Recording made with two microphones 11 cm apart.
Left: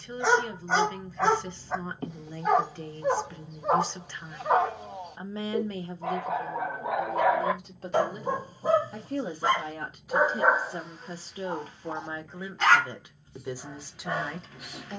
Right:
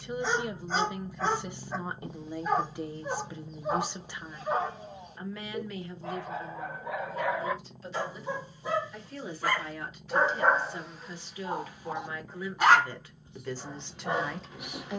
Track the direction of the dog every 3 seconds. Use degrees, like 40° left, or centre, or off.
70° left, 70° left, 60° left, 10° left, 20° right.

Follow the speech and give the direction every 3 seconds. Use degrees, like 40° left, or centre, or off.
10° right, centre, 50° left, 40° left, 10° left.